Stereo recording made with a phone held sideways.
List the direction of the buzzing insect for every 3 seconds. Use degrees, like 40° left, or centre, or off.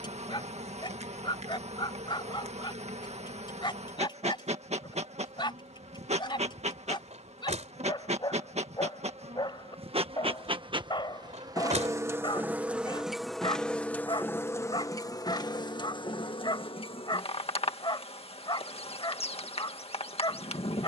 50° right, 50° right, 50° right, 40° right, centre, 40° left, 50° left.